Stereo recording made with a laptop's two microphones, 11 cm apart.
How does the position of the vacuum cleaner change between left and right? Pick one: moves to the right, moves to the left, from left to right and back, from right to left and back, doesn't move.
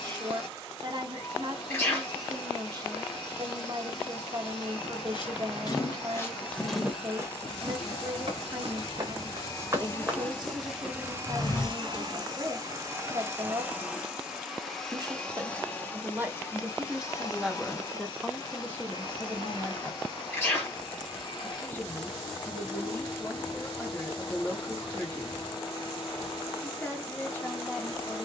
from left to right and back.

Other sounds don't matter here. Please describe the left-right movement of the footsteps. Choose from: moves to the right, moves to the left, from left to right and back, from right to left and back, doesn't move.
from left to right and back.